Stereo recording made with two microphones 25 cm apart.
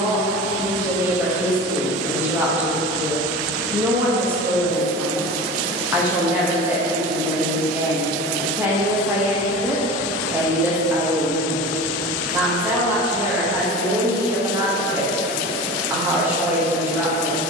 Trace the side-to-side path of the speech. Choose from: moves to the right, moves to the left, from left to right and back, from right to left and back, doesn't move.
doesn't move.